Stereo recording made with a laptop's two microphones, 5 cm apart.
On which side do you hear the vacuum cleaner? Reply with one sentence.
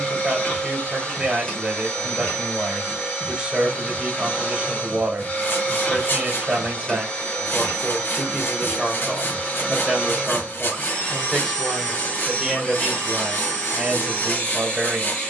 In this clip you hear the vacuum cleaner on the left.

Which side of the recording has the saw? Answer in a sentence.
You can hear the saw on the left.